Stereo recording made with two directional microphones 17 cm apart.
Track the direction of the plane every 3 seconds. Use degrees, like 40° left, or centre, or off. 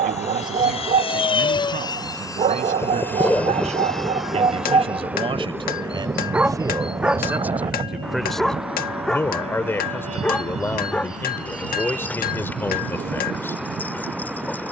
30° left, centre, 30° right, 40° right, 50° right.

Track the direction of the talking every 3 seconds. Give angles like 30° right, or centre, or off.
50° right, 40° right, 10° right, 10° left, 10° left.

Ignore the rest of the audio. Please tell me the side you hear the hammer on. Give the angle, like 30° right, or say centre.
60° left.